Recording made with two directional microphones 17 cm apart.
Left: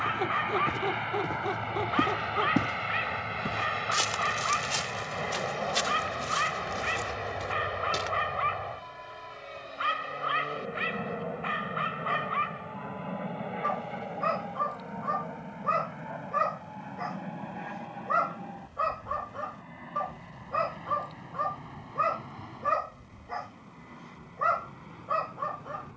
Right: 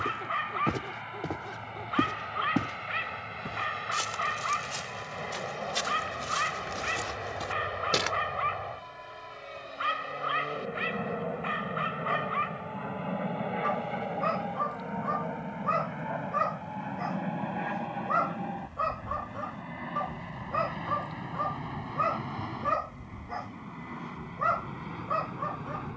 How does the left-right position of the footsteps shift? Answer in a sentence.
You can hear the footsteps move from right to left and back again.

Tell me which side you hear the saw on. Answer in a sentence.
You can hear the saw on the left.